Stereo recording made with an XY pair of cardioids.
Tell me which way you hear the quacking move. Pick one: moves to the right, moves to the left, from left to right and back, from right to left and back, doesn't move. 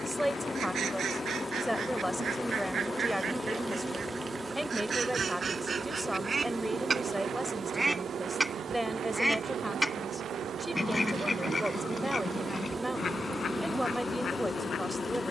moves to the left.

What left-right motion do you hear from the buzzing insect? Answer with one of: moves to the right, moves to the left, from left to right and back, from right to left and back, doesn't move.
from left to right and back.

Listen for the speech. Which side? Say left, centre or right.
centre.